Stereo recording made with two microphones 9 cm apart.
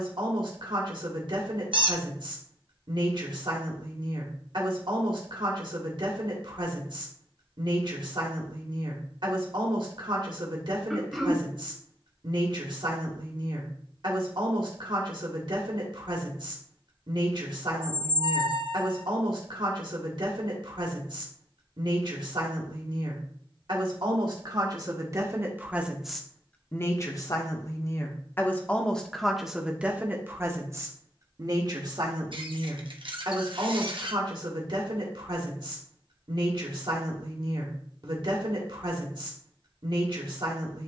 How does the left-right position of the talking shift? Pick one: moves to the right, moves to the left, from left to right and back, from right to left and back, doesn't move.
from right to left and back.